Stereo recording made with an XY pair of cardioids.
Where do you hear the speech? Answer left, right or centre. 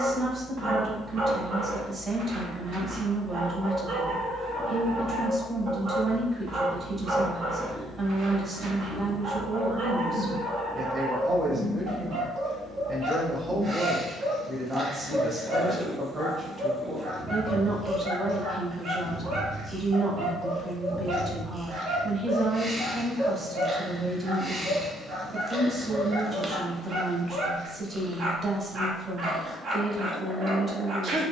right.